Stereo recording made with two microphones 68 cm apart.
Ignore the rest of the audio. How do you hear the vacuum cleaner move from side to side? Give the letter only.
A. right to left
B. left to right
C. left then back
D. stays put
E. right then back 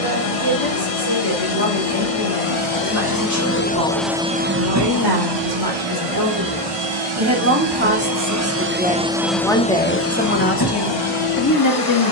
E.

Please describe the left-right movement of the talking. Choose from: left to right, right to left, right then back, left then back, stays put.
right to left.